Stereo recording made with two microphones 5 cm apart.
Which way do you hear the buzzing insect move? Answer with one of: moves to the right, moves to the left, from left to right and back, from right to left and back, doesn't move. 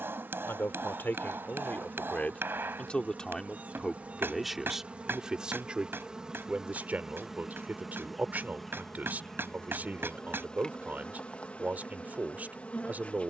moves to the left.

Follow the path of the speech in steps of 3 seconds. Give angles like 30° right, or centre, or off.
40° left, centre, 30° right, 30° right, 30° right.